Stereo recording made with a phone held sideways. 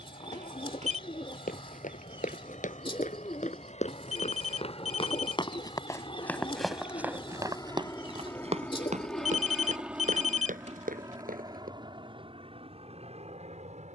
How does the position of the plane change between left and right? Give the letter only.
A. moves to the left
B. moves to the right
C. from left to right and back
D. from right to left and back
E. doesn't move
B.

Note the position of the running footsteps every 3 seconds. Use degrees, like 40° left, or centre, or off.
60° left, 40° left, 20° right, 70° right, off.